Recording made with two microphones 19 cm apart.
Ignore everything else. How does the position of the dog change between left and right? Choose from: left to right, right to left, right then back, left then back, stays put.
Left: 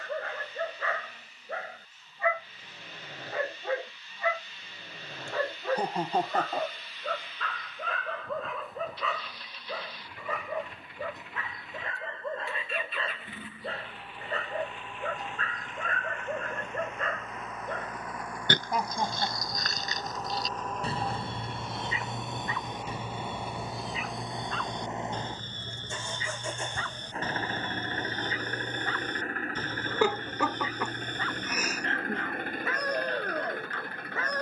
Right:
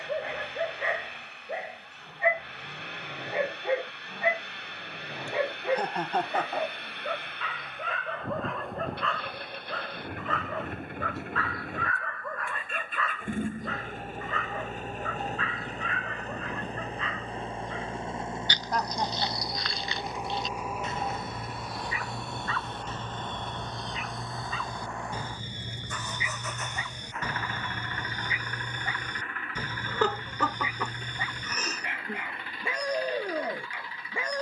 left then back.